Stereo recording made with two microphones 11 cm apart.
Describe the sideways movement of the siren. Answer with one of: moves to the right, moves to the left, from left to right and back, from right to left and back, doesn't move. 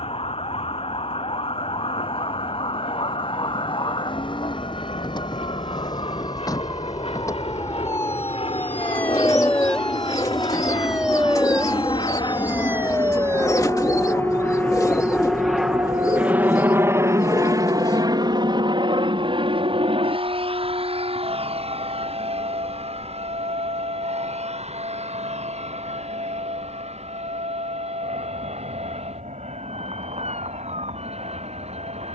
moves to the right.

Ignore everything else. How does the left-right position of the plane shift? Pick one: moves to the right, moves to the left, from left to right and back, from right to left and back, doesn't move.
moves to the right.